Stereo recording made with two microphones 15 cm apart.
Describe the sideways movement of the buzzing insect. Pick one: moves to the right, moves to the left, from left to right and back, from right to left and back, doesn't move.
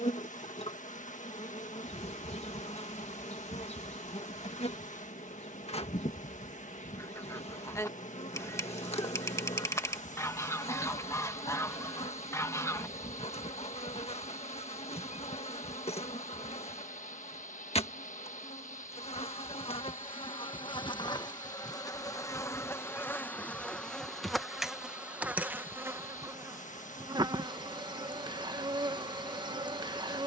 moves to the right.